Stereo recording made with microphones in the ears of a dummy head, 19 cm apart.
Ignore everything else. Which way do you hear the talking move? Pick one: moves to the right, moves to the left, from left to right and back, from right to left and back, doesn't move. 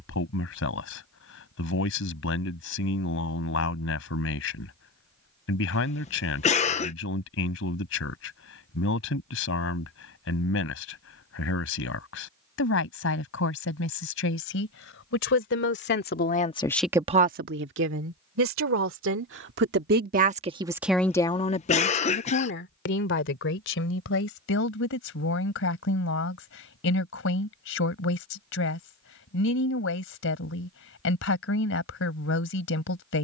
from left to right and back.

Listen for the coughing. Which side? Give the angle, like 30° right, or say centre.
30° left.